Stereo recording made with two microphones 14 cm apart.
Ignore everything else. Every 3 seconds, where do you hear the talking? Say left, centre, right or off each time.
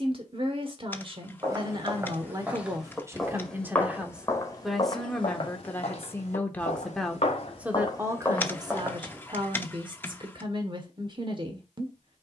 right, centre, centre, right.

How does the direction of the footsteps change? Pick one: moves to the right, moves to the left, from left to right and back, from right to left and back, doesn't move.
from right to left and back.